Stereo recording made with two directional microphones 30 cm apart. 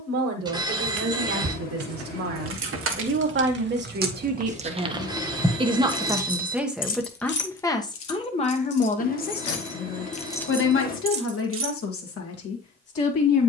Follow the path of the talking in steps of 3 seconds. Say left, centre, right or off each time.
right, right, centre, left, left.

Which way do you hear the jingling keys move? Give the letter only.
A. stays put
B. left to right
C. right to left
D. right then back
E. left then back
E.